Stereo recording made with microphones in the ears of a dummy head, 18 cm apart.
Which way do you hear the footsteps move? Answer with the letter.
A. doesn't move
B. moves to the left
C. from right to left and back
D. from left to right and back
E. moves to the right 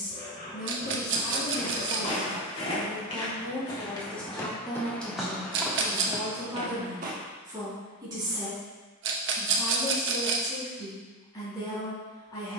E.